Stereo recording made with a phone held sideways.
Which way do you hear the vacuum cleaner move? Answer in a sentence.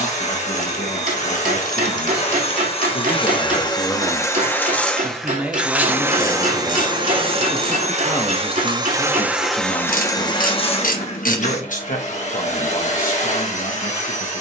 You can hear the vacuum cleaner move from left to right and back again.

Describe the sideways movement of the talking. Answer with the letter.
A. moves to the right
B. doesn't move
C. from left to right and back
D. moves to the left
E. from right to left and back
C.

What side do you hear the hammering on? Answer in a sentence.
You can hear the hammering on the right.